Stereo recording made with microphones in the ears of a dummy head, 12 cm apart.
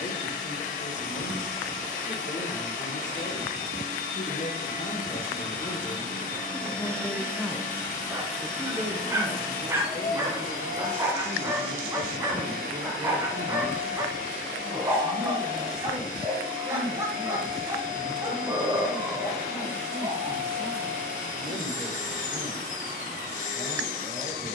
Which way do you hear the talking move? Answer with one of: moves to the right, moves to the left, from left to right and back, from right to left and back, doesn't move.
moves to the right.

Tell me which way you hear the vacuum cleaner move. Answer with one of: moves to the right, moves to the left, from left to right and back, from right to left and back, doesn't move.
doesn't move.